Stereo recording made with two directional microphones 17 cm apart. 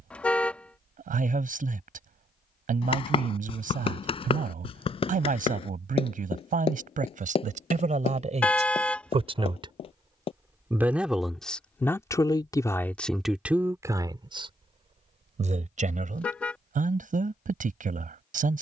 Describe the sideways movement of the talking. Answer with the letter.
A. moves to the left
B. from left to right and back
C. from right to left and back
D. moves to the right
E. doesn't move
C.